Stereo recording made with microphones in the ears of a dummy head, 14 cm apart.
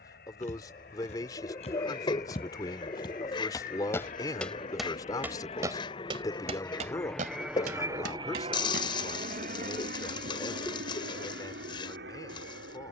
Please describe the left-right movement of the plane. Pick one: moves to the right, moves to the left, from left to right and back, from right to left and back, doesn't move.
moves to the right.